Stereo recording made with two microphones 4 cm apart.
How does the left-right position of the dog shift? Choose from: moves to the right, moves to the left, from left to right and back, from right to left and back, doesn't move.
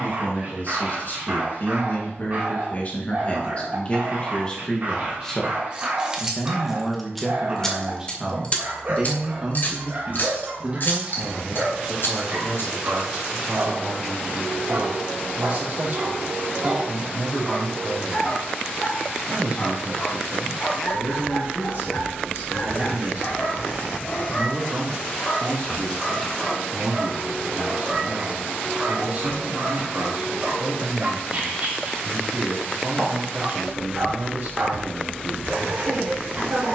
from right to left and back.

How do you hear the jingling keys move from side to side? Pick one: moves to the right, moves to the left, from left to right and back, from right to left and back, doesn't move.
moves to the left.